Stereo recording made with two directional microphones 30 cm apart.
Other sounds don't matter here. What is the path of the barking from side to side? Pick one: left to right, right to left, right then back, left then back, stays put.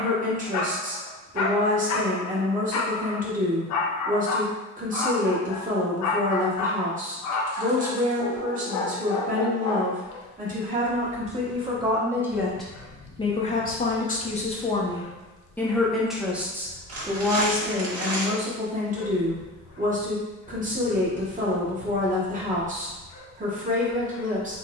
stays put.